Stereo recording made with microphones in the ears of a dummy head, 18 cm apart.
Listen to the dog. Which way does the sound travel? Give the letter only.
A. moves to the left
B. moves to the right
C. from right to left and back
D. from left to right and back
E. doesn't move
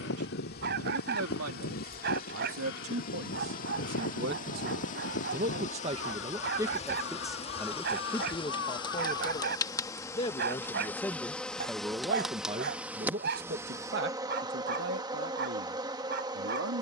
E.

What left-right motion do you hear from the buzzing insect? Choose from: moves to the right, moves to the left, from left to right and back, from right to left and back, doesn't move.
moves to the right.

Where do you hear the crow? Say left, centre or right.
left.